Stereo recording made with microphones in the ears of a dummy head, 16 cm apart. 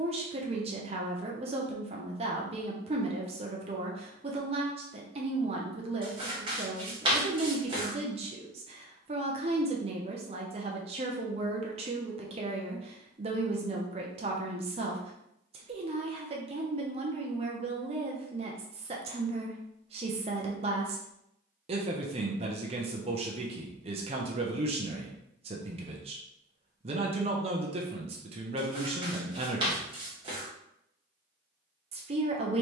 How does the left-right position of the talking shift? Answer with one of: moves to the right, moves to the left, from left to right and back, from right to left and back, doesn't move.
doesn't move.